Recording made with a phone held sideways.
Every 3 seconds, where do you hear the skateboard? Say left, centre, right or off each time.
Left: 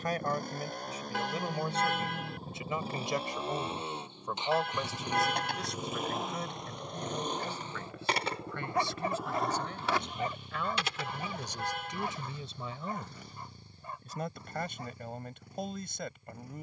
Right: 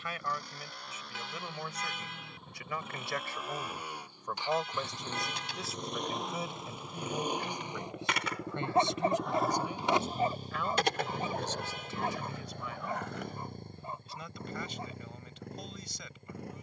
off, left, left, right, right, off.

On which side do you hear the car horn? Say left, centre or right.
left.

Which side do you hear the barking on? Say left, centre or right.
right.